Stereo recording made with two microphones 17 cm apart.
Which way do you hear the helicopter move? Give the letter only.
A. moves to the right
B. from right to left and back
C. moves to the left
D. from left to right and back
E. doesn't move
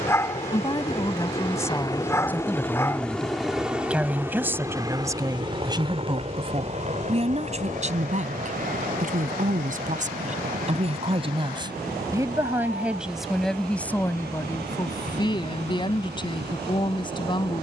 A.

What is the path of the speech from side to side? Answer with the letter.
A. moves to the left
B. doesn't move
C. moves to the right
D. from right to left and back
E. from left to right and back
E.